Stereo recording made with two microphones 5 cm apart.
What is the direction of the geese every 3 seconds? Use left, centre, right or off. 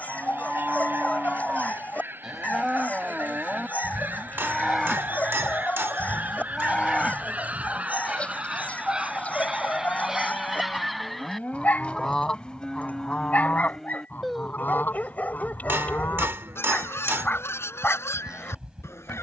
right, right, right, centre, left, left, left.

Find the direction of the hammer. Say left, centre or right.
right.